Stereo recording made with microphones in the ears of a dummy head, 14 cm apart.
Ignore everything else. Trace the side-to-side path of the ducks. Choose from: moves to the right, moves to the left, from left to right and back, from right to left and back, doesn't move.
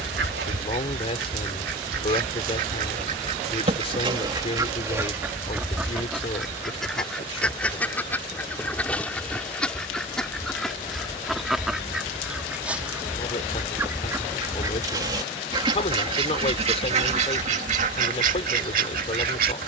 from right to left and back.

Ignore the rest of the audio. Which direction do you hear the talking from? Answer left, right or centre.
left.